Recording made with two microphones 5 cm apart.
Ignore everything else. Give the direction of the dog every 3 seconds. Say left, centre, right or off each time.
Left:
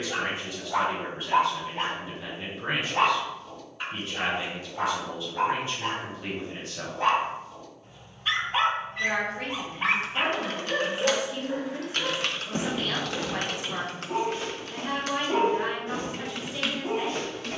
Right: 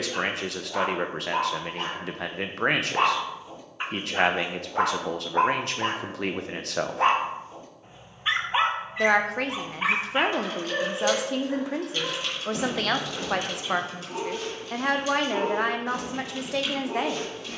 left, right, right, centre, left, left.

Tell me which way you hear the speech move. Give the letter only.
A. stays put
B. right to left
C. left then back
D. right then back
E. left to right
A.